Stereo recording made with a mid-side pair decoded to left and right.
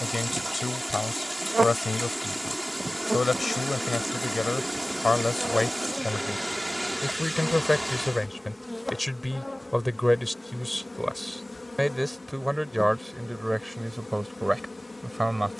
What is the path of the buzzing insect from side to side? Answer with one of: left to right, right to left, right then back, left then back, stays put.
right to left.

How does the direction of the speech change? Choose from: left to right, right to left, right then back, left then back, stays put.
left to right.